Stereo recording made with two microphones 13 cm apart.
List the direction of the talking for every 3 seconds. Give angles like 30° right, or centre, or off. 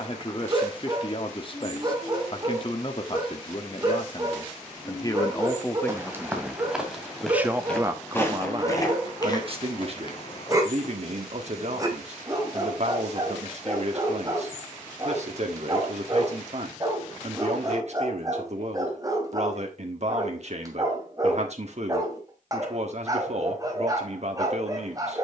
40° left, 30° left, 10° right, 50° right, 50° right, 50° right, 50° right, 50° right, 50° right.